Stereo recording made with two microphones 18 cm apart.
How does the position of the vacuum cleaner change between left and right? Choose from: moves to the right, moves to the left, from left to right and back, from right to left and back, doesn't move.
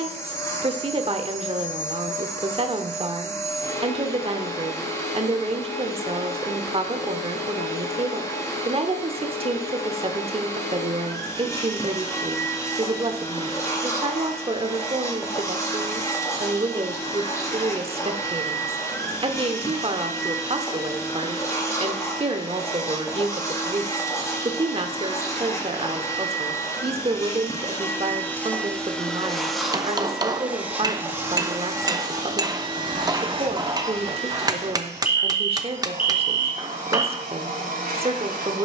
moves to the right.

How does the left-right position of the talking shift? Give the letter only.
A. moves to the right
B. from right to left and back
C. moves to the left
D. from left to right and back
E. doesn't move
E.